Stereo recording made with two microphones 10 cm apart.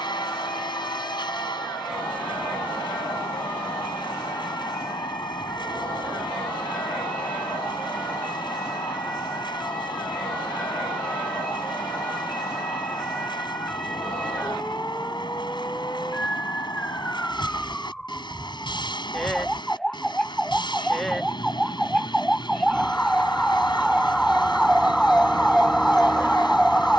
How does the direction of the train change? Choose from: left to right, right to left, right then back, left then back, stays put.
stays put.